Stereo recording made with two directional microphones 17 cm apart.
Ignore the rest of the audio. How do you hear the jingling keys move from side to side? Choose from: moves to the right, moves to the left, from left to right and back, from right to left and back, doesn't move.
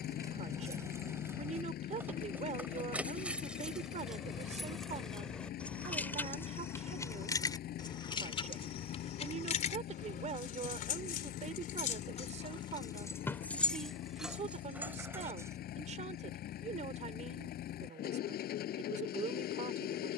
from right to left and back.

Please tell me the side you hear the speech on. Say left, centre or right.
right.